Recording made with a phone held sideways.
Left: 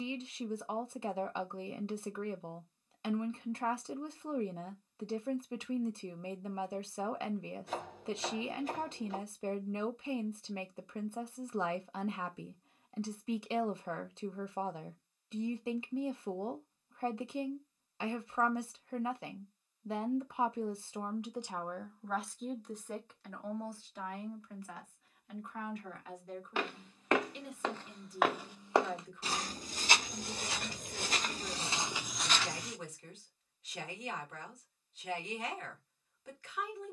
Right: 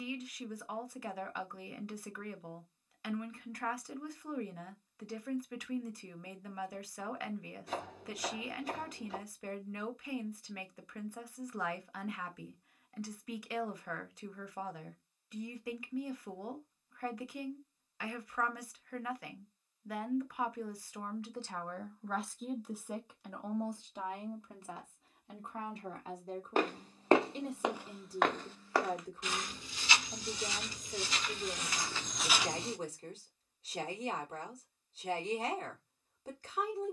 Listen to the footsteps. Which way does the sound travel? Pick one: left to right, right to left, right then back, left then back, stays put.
left then back.